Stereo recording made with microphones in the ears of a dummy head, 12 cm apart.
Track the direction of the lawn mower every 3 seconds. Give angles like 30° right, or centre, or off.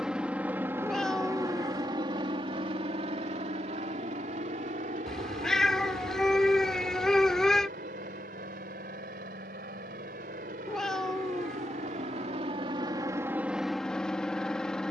30° right, 60° right, 70° right, 70° right, 20° right.